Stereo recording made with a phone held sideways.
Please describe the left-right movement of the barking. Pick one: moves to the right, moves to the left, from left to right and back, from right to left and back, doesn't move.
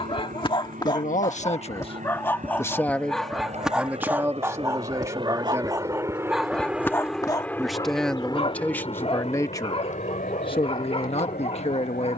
from left to right and back.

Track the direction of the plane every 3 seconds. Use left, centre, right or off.
right, right, centre, left.